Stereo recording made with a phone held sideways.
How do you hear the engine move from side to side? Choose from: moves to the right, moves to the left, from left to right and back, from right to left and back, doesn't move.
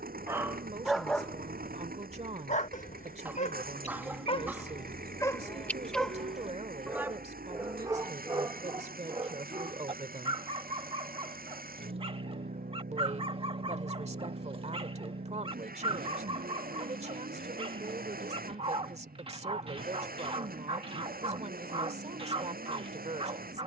doesn't move.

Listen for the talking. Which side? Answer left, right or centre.
right.